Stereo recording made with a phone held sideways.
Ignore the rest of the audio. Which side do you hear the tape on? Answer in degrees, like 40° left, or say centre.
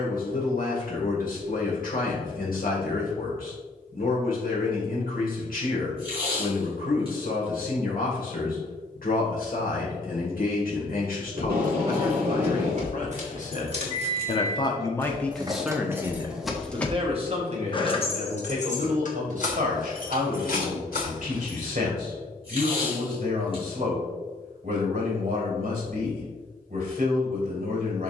40° right.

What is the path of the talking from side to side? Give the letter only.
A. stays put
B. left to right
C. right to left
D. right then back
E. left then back
B.